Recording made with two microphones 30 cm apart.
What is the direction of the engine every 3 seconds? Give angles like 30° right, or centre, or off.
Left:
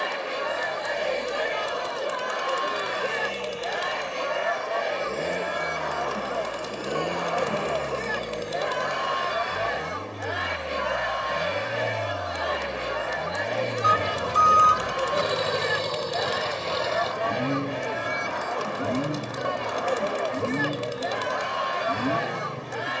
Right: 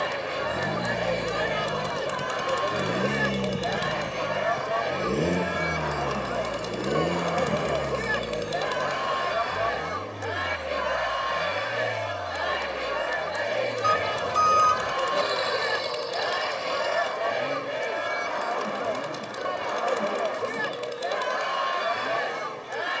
60° right, 40° right, 20° right, 10° left, 30° left, 40° left, 50° left, 60° left.